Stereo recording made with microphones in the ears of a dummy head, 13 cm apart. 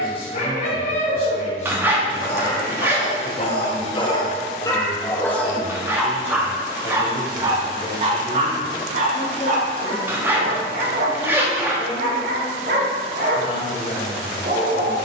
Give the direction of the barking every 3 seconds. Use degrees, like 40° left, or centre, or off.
50° left, 20° left, 30° right, 60° right, 70° right.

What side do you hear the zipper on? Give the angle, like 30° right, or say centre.
10° right.